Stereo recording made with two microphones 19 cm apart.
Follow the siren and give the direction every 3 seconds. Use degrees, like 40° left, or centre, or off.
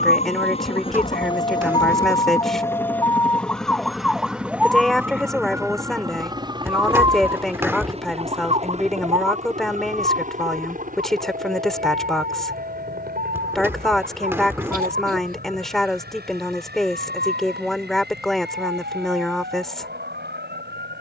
30° left, centre, 20° right, 40° right, 50° right, 50° right, 50° right.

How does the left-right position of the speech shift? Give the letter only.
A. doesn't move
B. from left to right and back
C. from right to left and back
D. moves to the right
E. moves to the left
A.